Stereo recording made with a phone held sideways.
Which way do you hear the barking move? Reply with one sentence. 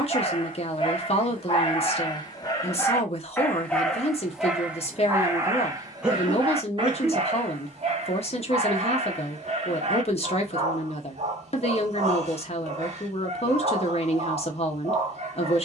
You can hear the barking move from left to right.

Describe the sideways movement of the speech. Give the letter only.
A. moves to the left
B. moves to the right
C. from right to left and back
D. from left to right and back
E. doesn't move
E.